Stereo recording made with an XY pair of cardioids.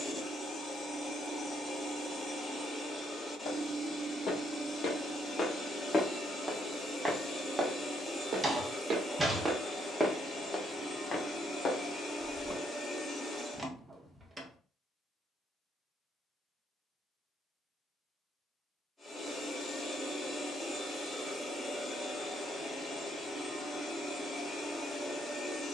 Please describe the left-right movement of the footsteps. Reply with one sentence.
You can hear the footsteps move from left to right and back again.